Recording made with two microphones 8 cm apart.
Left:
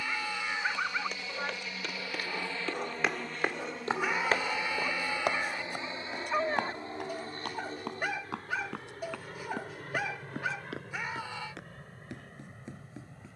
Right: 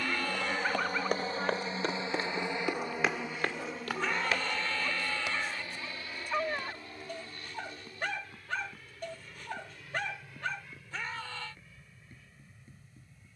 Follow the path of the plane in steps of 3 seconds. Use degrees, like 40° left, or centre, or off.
30° right, 10° left, 30° left, 40° left, 50° left.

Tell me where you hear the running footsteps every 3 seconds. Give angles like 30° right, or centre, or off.
30° right, 30° left, 70° left, 80° left, 80° left.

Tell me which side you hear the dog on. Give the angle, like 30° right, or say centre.
10° left.